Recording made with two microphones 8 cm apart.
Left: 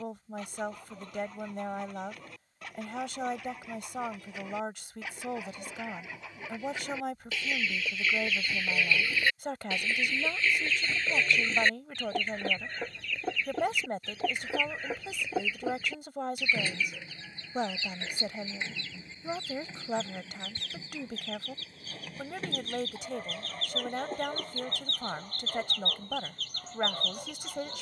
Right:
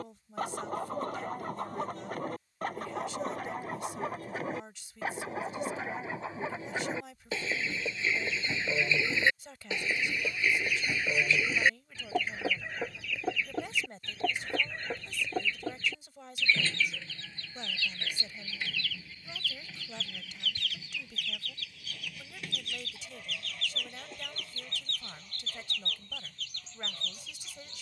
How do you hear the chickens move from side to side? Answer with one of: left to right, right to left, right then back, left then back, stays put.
right to left.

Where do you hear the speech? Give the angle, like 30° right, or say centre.
60° left.